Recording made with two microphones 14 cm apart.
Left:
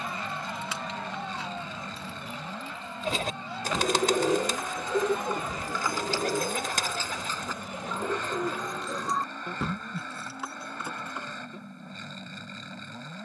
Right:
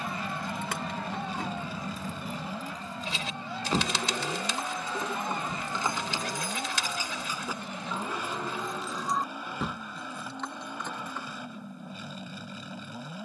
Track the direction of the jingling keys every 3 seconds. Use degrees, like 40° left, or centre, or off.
50° right, 30° right, 10° right, 10° left, off.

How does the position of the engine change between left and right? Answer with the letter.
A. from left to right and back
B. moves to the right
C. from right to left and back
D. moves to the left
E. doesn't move
E.